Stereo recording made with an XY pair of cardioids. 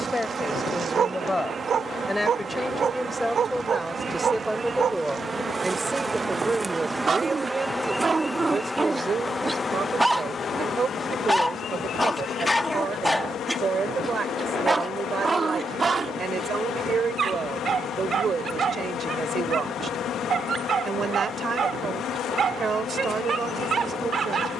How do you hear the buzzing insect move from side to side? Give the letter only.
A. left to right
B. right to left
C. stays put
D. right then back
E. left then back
B.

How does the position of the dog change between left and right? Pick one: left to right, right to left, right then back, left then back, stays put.
left then back.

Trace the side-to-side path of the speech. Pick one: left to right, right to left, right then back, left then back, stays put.
left to right.